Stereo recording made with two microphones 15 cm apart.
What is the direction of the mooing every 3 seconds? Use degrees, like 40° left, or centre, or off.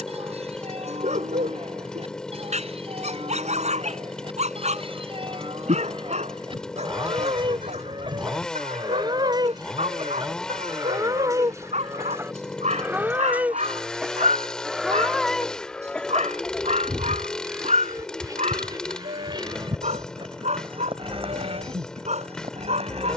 40° right, 40° right, 30° right, 20° right, 10° right, centre, 30° right, 40° right.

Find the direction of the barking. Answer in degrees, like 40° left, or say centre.
50° right.